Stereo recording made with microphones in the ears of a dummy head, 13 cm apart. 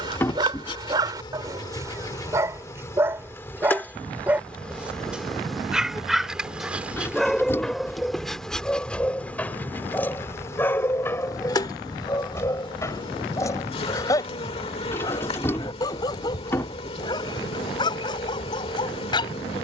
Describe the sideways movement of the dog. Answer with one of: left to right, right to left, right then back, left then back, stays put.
right to left.